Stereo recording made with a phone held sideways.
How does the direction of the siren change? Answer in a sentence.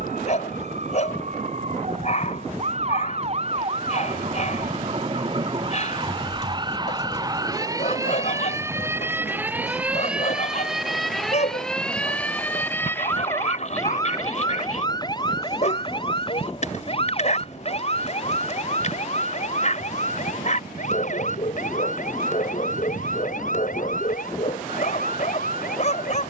In this clip you hear the siren travel towards the left.